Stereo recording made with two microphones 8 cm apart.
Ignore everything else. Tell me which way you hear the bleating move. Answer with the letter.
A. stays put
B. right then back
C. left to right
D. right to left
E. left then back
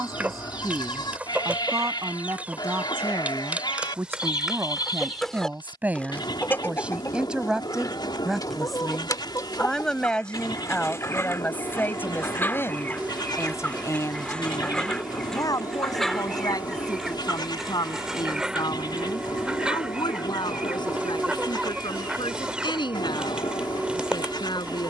A.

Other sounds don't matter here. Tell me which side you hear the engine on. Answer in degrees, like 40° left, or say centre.
20° right.